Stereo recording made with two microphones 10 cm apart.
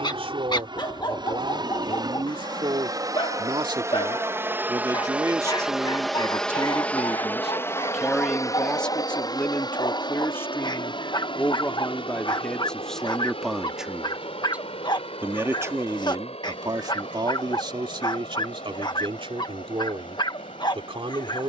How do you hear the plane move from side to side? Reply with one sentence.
In this clip you hear the plane move to the left.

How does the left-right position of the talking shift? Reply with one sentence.
You can hear the talking move from right to left and back again.